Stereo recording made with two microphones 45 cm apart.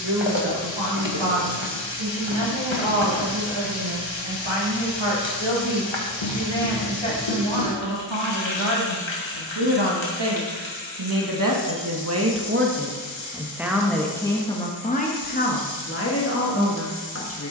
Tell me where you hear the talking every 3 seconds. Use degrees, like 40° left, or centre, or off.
80° right, 80° right, 80° right, 60° right, 10° right, 30° left.